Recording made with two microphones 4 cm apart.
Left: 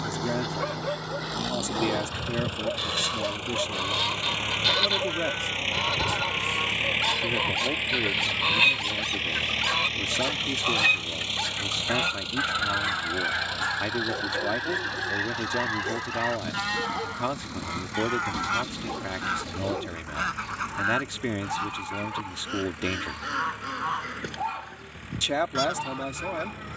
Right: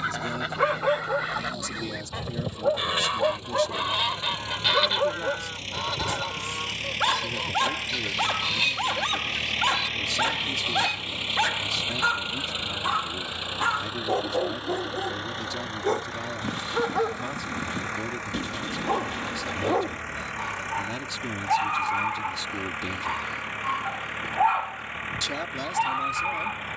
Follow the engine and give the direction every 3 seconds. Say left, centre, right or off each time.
left, left, left, centre, right, right, right, right, right.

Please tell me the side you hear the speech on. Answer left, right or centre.
left.